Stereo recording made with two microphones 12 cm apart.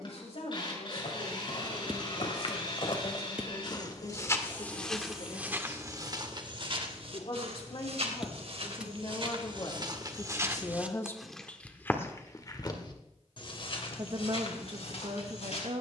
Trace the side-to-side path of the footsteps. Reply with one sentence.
In this clip you hear the footsteps go right and come back.